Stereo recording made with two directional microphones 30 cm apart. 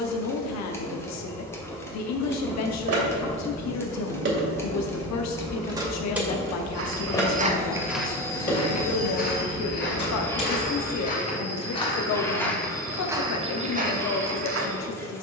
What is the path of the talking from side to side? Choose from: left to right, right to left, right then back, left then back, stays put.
stays put.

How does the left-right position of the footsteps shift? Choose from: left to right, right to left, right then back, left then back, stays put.
left then back.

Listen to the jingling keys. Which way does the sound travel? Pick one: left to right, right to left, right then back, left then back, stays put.
right to left.